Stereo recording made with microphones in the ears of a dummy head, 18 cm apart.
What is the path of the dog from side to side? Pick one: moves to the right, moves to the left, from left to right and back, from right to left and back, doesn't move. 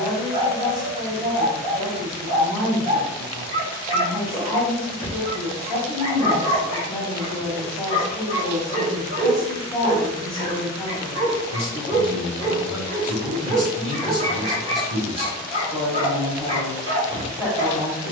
doesn't move.